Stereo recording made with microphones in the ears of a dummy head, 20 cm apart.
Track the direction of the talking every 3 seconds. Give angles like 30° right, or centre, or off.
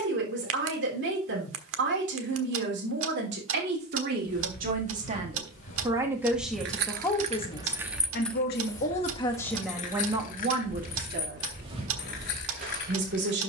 50° right, 40° right, 20° left, 20° right, 50° right.